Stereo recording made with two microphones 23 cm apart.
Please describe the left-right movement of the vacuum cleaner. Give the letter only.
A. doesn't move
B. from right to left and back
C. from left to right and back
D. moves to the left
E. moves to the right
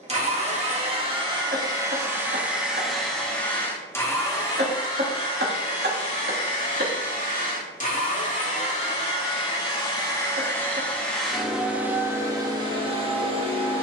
B.